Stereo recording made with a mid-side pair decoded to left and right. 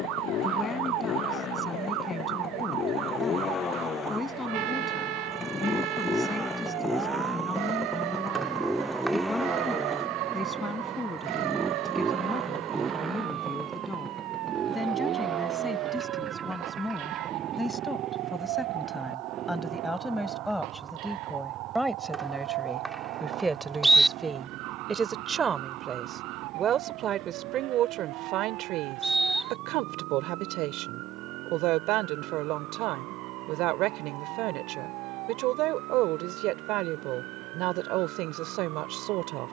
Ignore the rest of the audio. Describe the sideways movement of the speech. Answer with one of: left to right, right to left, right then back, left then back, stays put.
left to right.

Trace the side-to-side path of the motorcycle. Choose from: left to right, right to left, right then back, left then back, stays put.
left to right.